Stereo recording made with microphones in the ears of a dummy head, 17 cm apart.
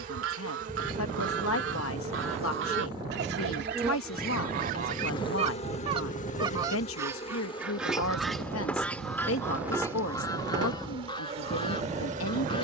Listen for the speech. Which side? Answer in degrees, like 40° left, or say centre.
80° left.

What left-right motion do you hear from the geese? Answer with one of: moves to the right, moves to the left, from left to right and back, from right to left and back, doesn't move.
moves to the left.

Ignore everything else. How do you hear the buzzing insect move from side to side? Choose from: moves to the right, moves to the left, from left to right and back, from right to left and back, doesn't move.
from right to left and back.